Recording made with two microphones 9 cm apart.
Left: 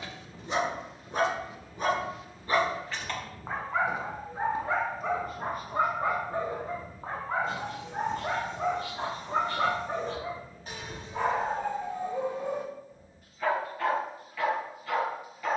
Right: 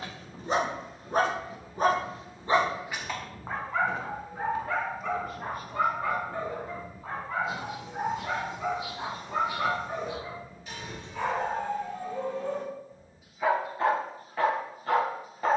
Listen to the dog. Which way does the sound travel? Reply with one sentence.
You can hear the dog go left and come back.